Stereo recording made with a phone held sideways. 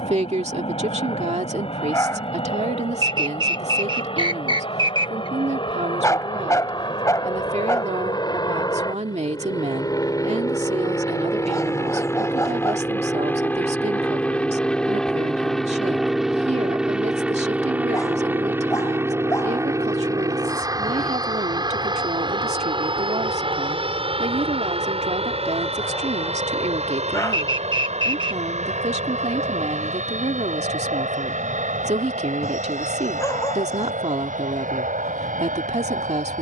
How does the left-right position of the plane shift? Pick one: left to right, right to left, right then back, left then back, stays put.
left to right.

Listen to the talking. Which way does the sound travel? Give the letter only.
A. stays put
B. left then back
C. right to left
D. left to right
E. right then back
A.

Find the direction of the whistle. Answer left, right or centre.
right.